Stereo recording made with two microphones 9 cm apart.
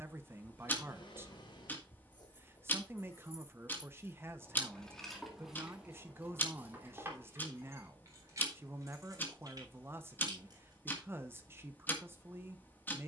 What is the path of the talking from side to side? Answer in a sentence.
You can hear the talking stay put.